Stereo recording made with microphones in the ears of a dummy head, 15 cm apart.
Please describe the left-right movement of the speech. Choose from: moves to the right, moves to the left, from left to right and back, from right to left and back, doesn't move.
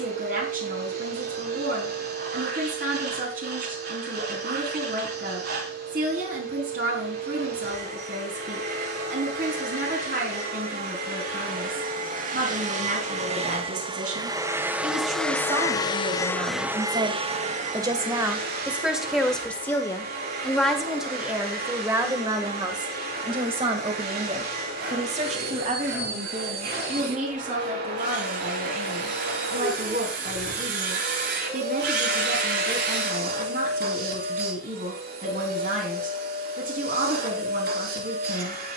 from right to left and back.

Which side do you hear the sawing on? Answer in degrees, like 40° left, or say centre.
60° right.